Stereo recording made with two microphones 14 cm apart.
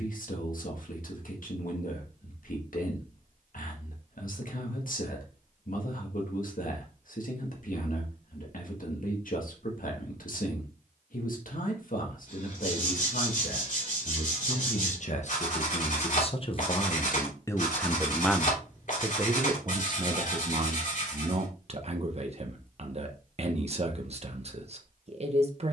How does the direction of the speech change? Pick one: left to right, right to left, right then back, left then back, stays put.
left to right.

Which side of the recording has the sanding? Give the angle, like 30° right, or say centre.
60° left.